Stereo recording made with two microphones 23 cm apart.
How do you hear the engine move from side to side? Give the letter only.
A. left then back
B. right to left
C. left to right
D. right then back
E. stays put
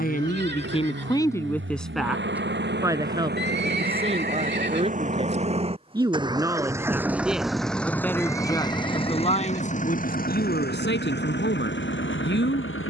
B.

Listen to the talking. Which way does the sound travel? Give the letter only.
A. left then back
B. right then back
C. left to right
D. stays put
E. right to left
B.